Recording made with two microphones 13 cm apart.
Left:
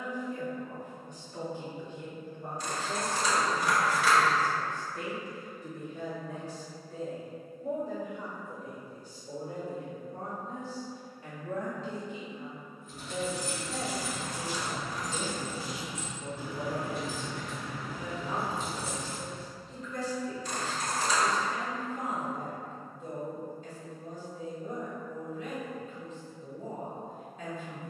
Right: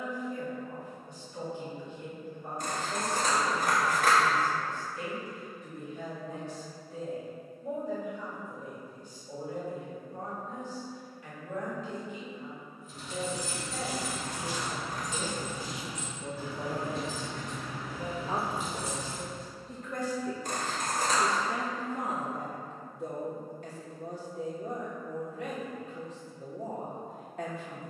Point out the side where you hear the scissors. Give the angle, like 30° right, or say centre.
50° right.